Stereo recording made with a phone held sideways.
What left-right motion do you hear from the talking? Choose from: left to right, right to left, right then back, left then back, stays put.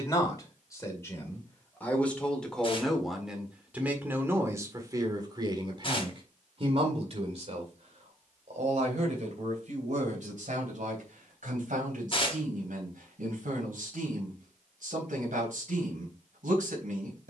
left to right.